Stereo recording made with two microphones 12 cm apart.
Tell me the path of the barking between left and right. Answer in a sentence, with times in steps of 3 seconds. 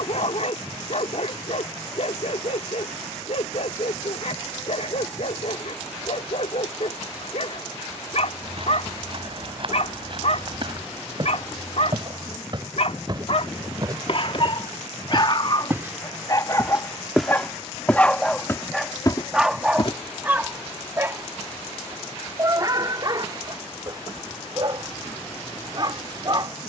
You can hear the barking on the left from 0 s, in the centre from 18 s and on the right from 21 s.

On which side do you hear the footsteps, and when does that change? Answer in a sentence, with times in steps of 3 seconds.
In this clip you hear the footsteps not at all from 0 s, on the right from 6 s, in the centre from 15 s, on the left from 18 s and not at all from 21 s.